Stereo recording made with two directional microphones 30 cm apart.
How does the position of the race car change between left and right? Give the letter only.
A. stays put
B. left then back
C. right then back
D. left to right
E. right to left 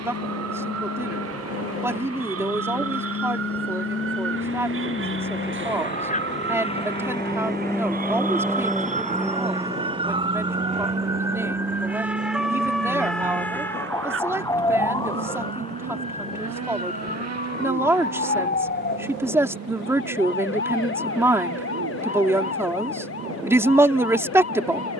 D.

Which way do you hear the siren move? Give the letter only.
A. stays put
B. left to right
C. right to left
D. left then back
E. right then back
C.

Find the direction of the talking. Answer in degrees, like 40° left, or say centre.
10° right.